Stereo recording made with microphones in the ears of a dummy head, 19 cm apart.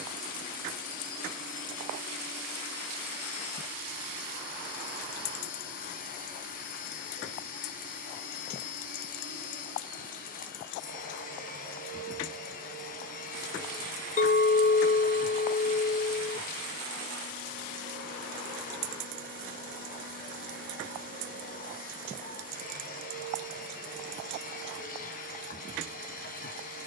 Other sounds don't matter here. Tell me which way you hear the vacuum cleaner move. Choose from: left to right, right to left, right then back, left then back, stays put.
stays put.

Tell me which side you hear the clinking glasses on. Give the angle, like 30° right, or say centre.
40° left.